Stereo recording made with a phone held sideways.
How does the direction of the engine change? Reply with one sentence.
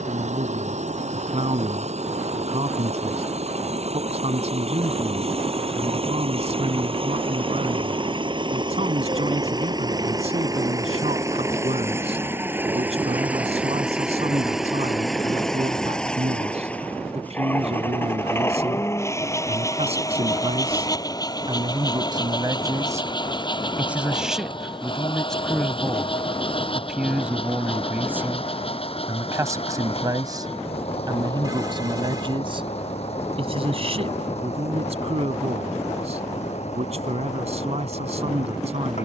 You can hear the engine travel towards the left.